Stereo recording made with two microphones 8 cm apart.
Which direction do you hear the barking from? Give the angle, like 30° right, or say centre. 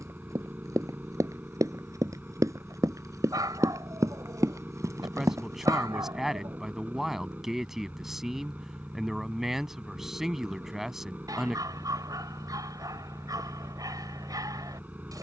50° right.